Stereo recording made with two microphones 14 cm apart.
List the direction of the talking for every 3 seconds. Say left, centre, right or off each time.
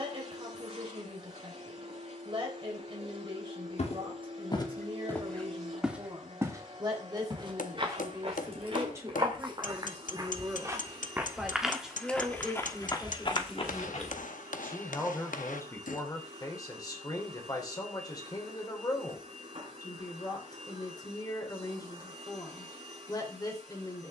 right, right, right, centre, centre, left, left, left.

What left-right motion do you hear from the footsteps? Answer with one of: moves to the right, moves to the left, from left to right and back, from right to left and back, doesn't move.
from left to right and back.